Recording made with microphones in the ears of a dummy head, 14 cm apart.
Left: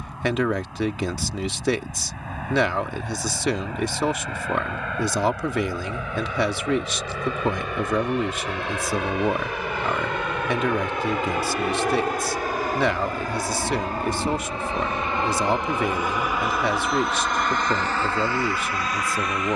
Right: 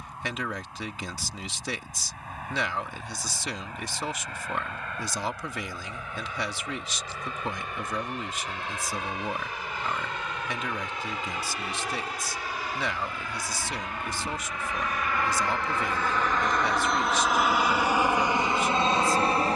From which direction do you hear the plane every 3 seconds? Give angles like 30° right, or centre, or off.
70° left, 70° left, 60° left, 50° left, 40° left, 10° left, 20° right.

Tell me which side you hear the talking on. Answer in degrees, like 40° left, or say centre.
50° left.